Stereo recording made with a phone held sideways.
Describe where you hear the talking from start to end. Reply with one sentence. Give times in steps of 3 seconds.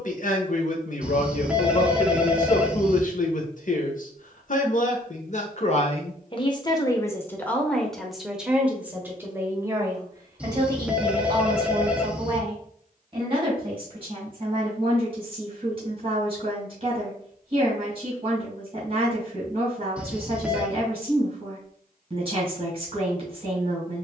You can hear the talking on the left from 0 s, in the centre from 6 s and on the right from 9 s.